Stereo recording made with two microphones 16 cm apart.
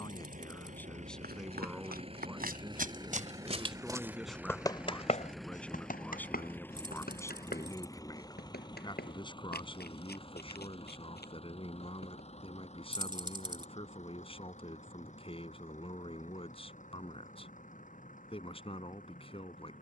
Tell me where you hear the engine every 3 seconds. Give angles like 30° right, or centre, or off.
40° right, 10° right, 20° left, 30° left, 40° left, 50° left, 50° left.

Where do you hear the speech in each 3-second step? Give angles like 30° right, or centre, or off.
centre, centre, 20° left, 30° left, 30° left, 30° left, 30° left.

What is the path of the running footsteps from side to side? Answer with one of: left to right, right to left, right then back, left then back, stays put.
right to left.